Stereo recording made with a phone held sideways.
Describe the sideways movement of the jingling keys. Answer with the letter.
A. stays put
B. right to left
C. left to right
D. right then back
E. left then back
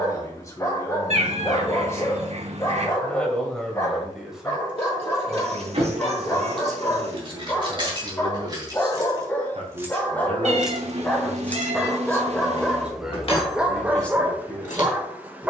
B.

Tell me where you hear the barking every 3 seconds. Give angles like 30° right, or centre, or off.
20° left, 20° left, 20° left, 10° left, 10° right.